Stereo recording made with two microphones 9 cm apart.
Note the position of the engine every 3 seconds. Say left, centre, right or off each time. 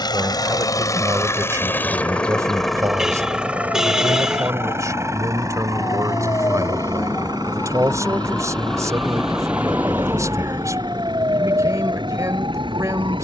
left, right, right, right, right.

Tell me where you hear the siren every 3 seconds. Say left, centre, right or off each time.
left, left, left, right, right.